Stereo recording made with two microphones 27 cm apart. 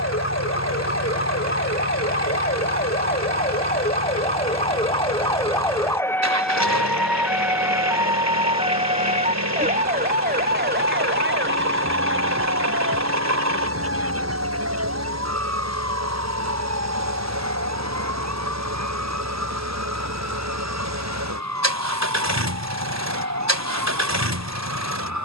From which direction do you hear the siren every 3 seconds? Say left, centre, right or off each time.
left, left, centre, right, right, right, right, right, right.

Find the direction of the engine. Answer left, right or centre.
right.